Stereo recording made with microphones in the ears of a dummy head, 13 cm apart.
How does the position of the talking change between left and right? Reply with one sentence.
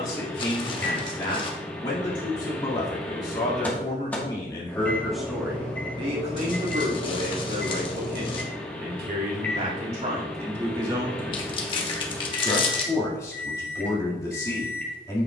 You can hear the talking move from left to right and back again.